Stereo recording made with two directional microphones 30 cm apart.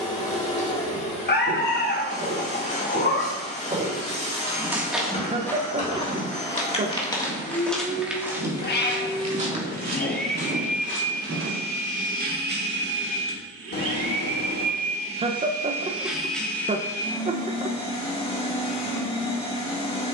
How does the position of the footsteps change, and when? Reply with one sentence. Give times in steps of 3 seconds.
You can hear the footsteps on the right from 0 s, in the centre from 3 s, on the right from 9 s and not at all from 12 s.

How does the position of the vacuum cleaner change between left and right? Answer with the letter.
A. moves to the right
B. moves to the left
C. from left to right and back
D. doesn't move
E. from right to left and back
C.